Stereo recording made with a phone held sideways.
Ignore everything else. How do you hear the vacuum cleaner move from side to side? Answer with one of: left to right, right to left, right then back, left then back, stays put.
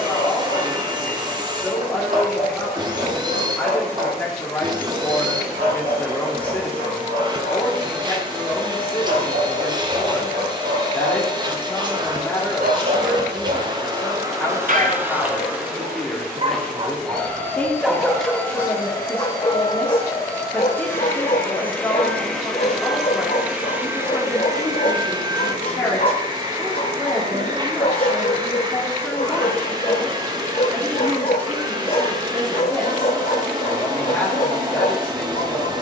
left then back.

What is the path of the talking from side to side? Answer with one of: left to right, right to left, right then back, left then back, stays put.
stays put.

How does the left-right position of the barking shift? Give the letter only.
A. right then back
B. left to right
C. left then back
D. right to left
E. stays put
D.